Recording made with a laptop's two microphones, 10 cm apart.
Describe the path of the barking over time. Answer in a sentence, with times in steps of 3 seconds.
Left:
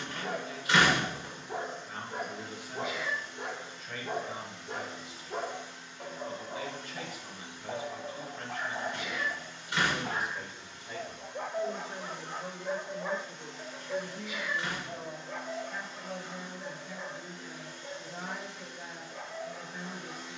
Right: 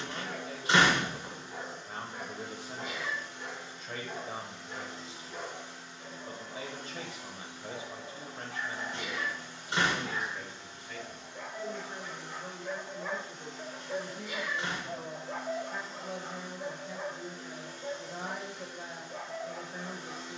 You can hear the barking on the left from 0 s, in the centre from 12 s and on the right from 15 s.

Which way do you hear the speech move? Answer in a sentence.
You can hear the speech go left and come back.